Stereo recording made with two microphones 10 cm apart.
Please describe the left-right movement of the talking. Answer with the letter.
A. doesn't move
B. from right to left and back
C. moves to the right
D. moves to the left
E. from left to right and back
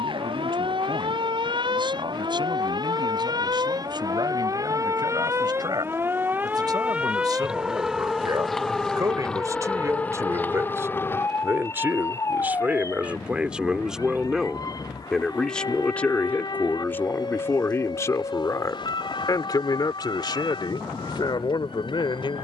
D.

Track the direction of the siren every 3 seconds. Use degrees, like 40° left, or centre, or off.
60° right, 40° right, 10° right, 20° left, 40° left, 50° left, 50° left, 60° left.